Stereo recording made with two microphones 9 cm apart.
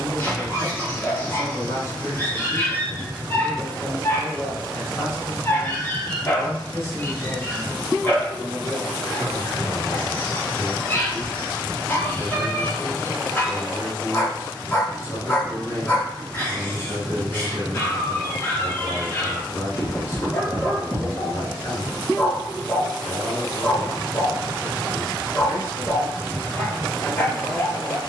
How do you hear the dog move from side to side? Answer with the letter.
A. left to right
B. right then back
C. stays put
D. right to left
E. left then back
C.